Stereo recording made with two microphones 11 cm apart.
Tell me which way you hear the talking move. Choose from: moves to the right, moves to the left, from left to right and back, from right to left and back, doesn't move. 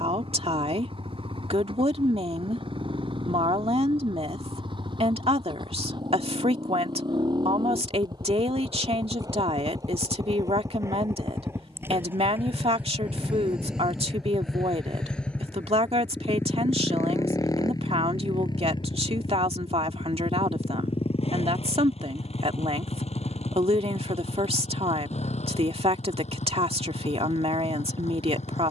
doesn't move.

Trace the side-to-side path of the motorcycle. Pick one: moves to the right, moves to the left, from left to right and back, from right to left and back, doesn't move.
moves to the left.